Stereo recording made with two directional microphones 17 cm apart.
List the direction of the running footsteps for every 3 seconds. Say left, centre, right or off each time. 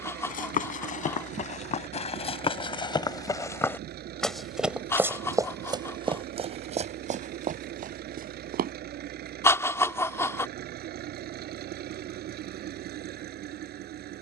left, centre, right, off, off.